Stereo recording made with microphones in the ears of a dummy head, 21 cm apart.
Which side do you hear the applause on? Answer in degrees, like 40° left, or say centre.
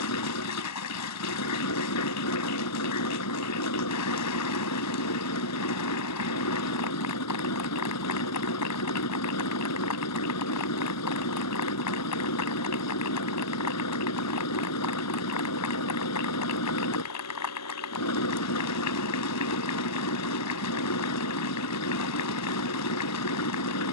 80° left.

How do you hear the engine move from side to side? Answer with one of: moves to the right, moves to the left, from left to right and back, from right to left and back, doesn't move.
doesn't move.